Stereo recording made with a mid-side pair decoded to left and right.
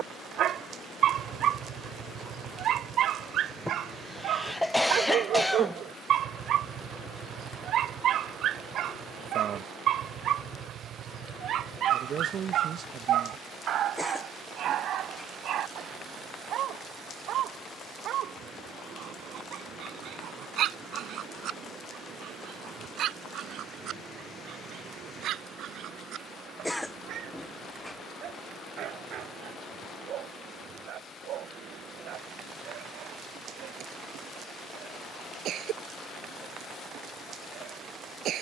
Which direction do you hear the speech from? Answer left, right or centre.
right.